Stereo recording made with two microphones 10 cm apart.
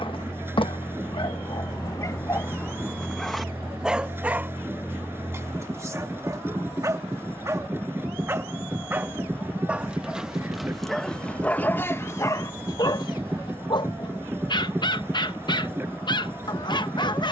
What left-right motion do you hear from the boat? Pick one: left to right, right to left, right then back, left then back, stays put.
stays put.